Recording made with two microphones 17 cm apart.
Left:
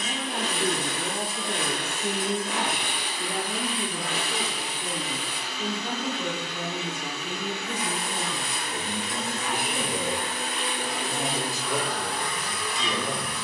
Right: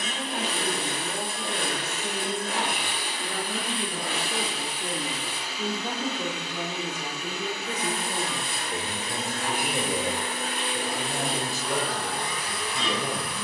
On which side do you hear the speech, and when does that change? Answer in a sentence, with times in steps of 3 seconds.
In this clip you hear the speech on the left from 0 s, in the centre from 3 s and on the right from 6 s.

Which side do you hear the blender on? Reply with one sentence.
You can hear the blender in the centre.